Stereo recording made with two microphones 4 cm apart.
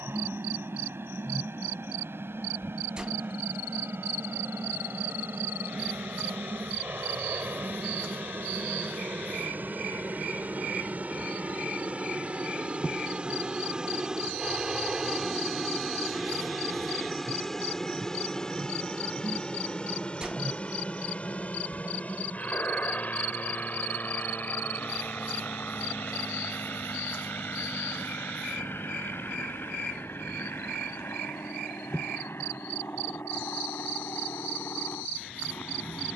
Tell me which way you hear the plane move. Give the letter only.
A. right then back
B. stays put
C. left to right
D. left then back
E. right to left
E.